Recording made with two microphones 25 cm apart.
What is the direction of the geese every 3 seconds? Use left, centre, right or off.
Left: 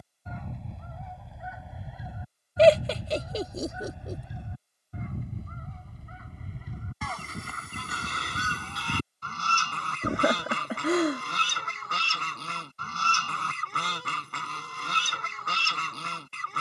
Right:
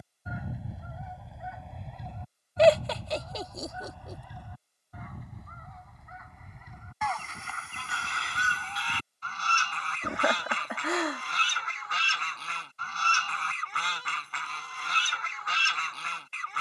centre, left, left, left, left, left.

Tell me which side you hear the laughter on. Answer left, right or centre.
left.